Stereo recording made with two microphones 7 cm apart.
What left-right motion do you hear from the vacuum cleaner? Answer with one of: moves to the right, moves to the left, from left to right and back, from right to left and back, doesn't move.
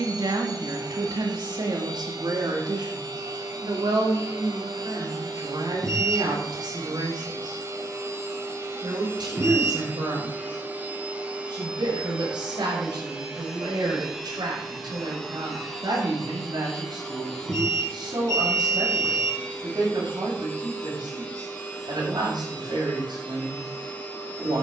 moves to the left.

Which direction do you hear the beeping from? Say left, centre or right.
right.